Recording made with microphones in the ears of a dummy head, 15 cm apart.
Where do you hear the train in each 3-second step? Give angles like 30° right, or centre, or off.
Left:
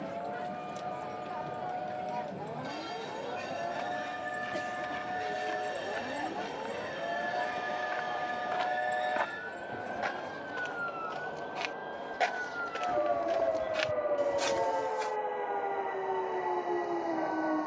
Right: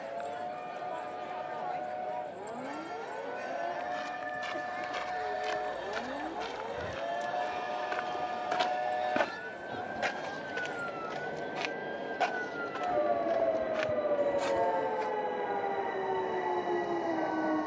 50° left, 40° left, 20° left, 10° right, 40° right, 50° right.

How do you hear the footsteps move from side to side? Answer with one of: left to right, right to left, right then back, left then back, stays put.
right to left.